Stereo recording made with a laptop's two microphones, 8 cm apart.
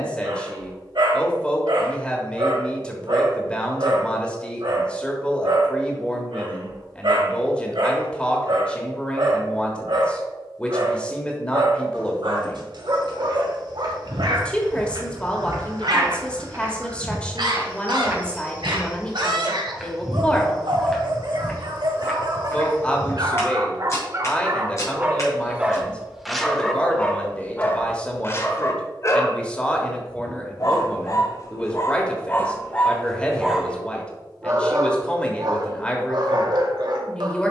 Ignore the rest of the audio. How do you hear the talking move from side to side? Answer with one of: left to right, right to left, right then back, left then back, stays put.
stays put.